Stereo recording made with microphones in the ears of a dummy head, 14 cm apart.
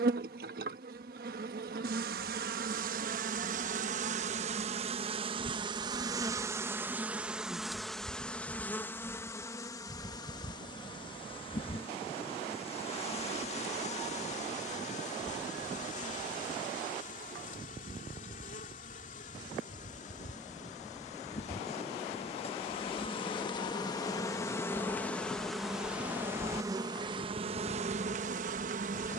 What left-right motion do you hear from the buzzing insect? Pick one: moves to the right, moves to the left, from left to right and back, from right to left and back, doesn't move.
from right to left and back.